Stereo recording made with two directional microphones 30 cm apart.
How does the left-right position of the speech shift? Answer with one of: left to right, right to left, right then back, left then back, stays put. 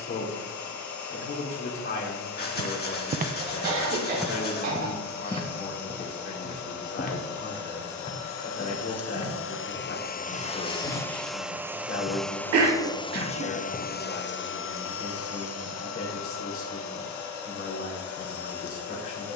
stays put.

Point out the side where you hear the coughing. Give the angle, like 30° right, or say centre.
60° right.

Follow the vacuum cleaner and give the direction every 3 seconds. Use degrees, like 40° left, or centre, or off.
70° left, 70° left, 70° left, 20° left, 20° left, 60° left, 70° left.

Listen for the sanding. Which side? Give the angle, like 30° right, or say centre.
30° left.